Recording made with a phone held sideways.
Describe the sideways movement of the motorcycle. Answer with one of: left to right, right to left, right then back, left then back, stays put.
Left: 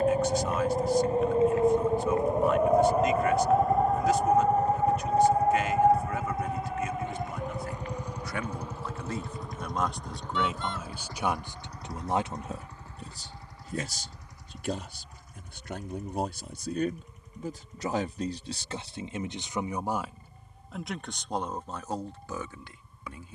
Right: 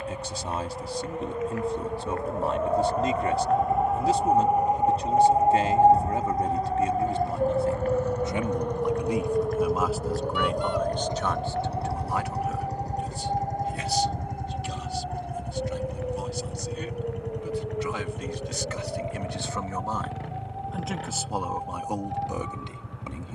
left to right.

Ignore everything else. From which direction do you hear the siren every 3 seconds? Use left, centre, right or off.
left, centre, right, right, right, right, right, right.